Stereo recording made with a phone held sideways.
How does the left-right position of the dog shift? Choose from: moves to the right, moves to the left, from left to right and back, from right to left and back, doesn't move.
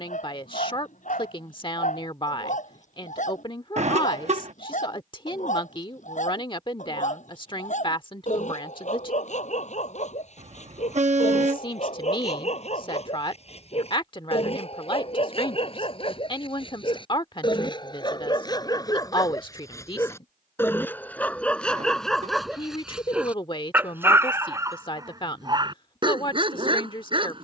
moves to the right.